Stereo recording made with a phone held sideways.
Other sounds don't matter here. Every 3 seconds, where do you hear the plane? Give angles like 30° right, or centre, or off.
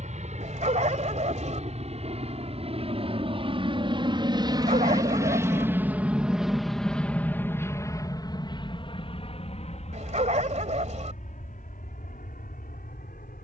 50° right, 30° right, 10° left, 50° left, 60° left.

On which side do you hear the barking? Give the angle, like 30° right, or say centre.
50° right.